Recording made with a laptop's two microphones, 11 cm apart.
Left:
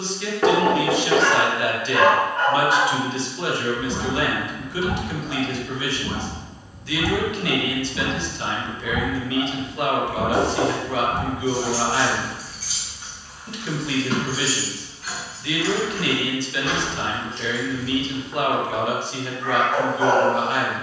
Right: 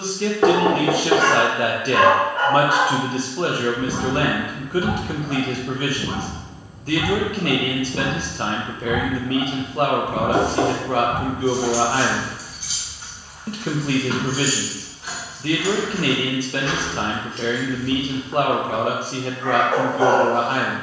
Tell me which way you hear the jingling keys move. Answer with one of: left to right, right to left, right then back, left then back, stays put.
right then back.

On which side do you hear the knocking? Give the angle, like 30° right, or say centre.
20° right.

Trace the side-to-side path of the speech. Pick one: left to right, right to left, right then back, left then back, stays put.
stays put.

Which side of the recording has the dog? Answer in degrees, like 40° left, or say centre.
70° right.